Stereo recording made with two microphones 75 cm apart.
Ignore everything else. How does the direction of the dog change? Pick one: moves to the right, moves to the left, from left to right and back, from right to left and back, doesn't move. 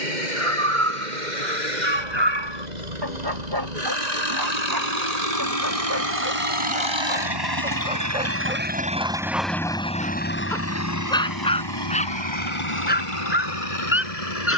moves to the left.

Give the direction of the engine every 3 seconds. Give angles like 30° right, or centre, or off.
70° right, 60° right, 30° right, 20° left, 40° left.